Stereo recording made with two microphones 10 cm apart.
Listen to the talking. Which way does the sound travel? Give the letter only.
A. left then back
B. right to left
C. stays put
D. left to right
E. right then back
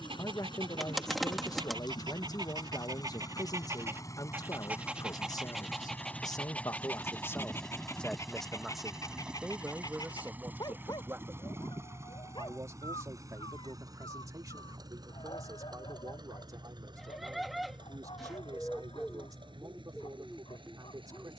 D.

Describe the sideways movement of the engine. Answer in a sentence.
In this clip you hear the engine move to the right.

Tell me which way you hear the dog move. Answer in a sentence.
In this clip you hear the dog travel towards the left.